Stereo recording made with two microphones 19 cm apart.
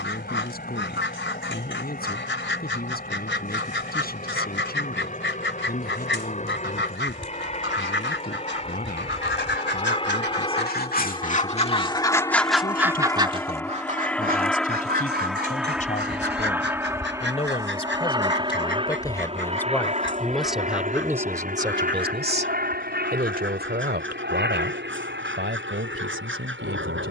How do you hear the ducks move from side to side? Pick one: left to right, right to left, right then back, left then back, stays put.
left to right.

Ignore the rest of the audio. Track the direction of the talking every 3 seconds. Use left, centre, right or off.
left, left, left, left, left, left, centre, right, right.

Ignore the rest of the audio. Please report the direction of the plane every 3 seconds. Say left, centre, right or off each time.
left, left, left, left, centre, centre, right, right, right.